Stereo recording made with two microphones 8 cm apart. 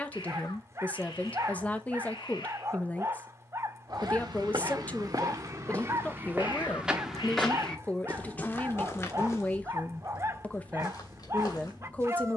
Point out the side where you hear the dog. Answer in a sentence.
In this clip you hear the dog on the right.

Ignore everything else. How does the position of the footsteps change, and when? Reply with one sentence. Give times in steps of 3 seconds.
You can hear the footsteps not at all from 0 s, on the right from 3 s, in the centre from 6 s and on the left from 9 s.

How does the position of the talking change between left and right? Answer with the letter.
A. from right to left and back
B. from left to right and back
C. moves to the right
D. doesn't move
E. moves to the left
D.